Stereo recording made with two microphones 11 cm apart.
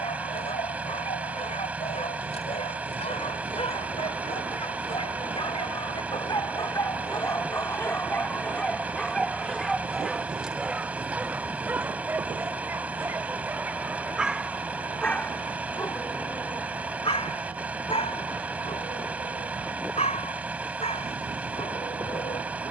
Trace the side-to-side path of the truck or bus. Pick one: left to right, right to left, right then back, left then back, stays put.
stays put.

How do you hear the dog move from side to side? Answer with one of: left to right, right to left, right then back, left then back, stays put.
right then back.